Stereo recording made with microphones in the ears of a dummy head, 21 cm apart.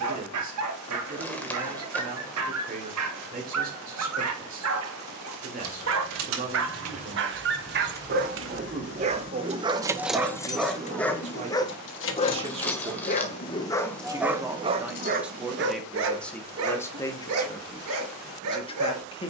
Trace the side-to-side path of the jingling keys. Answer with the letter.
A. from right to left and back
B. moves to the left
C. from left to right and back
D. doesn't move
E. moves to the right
B.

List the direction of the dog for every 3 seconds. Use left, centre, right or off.
right, right, right, centre, centre, right, right.